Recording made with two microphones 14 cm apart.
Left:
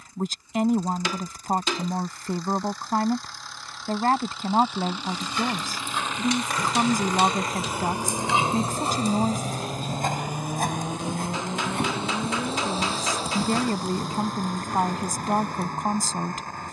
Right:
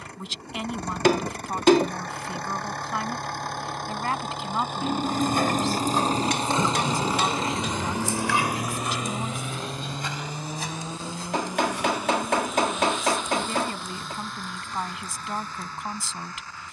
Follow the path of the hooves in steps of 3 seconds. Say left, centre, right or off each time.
off, right, centre, left, left, left.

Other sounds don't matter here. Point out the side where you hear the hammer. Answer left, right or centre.
right.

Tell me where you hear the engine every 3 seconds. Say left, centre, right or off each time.
right, right, right, centre, left, left.